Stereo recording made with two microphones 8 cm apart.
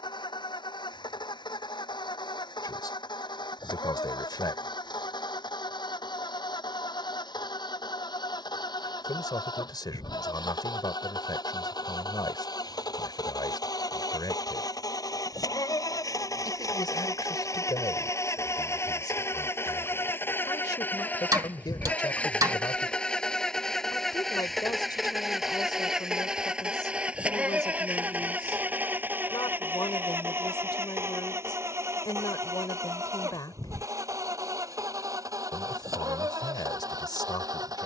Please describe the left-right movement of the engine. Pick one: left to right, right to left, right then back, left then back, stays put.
left to right.